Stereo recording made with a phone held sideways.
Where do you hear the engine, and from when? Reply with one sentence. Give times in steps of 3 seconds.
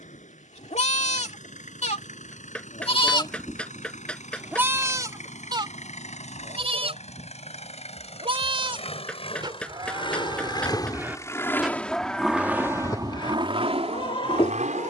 You can hear the engine on the left from 0 s and on the right from 12 s.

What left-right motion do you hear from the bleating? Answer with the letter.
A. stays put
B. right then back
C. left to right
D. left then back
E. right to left
B.